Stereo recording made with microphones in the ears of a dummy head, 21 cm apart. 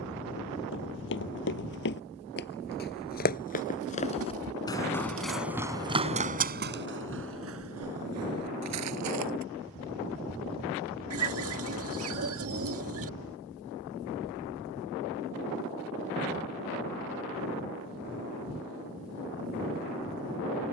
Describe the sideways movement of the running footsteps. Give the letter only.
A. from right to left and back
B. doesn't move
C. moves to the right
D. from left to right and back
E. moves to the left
C.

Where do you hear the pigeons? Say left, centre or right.
right.